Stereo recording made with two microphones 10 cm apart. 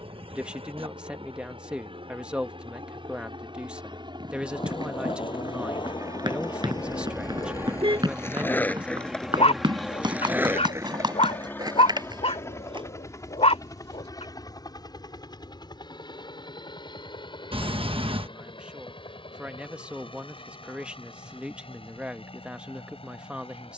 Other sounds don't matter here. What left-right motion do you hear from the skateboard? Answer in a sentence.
You can hear the skateboard go from the left side to the right.